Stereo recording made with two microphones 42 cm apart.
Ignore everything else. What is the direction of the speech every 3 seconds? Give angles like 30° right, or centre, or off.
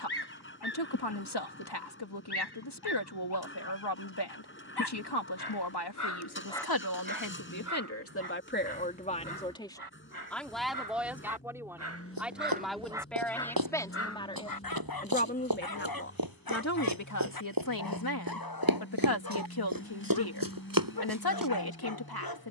70° left, 70° left, 40° left, centre, centre, 40° left, 60° left, 60° left.